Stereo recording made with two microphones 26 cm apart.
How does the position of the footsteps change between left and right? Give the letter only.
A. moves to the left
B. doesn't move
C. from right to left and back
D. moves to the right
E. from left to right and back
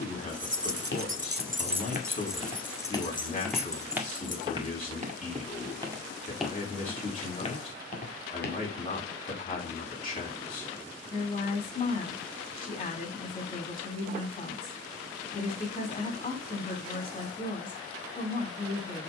E.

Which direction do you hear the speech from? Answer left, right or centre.
left.